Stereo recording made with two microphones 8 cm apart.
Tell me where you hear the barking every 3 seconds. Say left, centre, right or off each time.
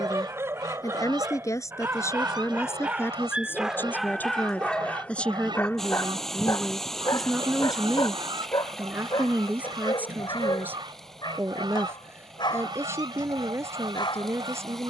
right, centre, left, left, left.